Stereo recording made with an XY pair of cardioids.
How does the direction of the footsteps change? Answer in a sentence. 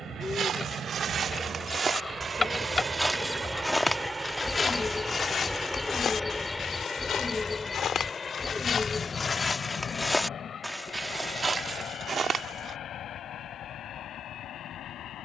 In this clip you hear the footsteps go left and come back.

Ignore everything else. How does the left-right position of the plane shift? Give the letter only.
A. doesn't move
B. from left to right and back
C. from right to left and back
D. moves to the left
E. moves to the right
D.